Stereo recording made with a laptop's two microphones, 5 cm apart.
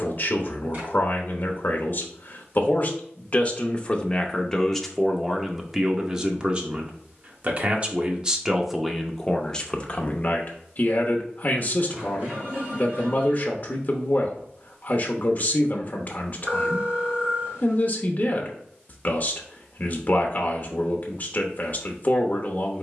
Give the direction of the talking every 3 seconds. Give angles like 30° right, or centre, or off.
40° left, 10° left, 20° right, 30° left, 40° left, 40° left, 40° left, 40° left.